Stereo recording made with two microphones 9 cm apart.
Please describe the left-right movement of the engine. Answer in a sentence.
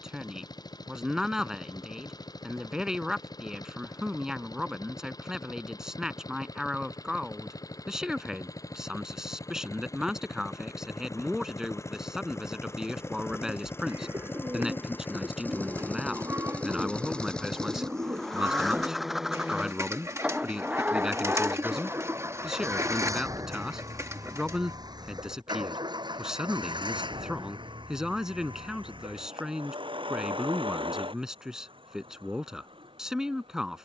You can hear the engine move to the right.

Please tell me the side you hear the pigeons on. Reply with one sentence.
In this clip you hear the pigeons on the right.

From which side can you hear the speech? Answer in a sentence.
You can hear the speech in the centre.